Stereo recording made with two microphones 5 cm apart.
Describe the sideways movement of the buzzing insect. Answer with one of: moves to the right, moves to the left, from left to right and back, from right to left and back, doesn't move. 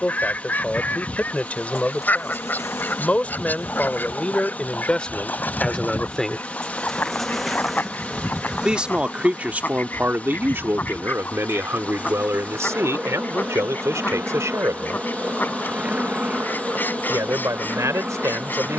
moves to the right.